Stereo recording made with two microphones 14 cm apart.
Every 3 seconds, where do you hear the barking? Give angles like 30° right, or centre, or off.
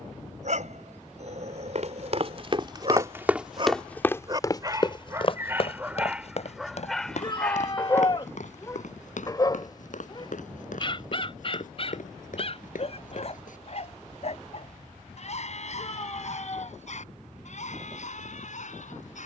50° right, 20° right, 10° left, 40° left, 50° left, 60° left, 60° left.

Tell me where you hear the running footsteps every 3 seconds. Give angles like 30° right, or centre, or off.
40° right, 20° left, 60° left, 70° left, 70° left, off, off.